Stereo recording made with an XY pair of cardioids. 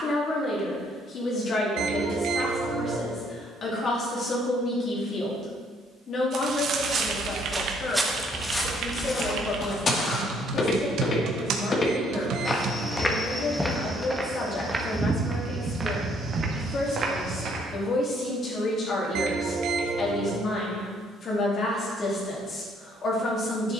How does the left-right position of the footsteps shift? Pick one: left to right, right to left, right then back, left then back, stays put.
left then back.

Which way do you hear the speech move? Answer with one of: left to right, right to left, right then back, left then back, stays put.
stays put.